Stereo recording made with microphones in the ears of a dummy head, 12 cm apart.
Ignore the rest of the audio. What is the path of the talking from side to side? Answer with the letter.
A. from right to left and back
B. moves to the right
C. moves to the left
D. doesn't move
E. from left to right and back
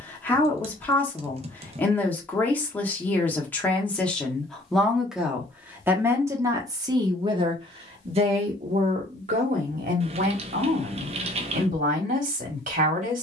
B.